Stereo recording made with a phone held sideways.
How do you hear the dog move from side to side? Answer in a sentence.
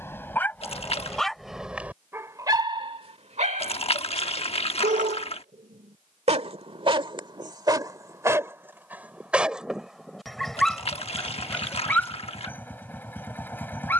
In this clip you hear the dog go right and come back.